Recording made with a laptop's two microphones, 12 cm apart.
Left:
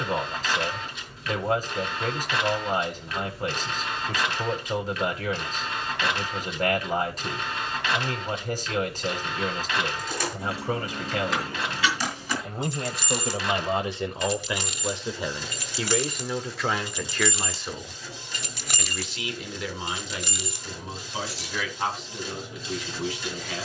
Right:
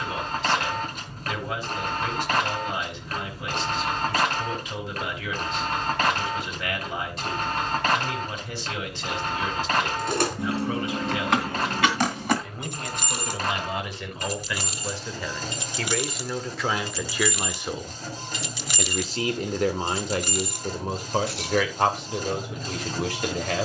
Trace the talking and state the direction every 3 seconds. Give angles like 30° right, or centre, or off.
40° left, 40° left, 40° left, 40° left, 30° left, centre, 50° right, 70° right.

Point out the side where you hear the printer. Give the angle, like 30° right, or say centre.
50° right.